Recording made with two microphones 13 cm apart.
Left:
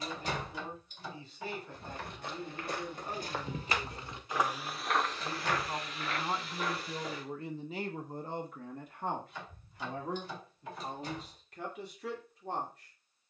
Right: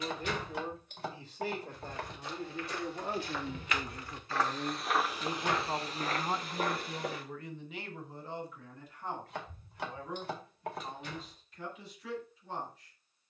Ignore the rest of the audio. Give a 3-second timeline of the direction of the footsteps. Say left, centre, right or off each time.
left, centre, right, off, off.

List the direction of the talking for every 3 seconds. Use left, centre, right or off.
right, right, left, left, left.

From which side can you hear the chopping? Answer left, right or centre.
right.